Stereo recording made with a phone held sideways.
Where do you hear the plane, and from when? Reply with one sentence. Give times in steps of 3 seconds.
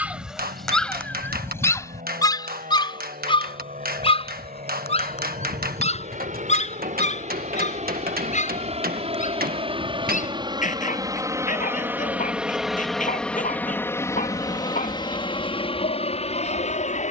You can hear the plane on the right from 0 s, in the centre from 12 s and on the left from 15 s.